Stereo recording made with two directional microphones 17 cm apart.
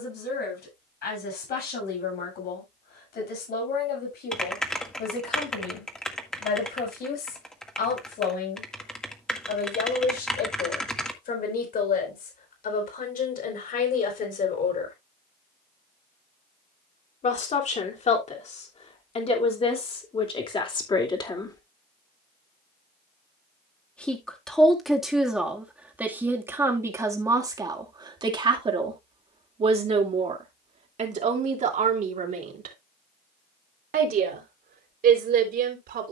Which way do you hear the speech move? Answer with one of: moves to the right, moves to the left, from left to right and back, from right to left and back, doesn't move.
moves to the right.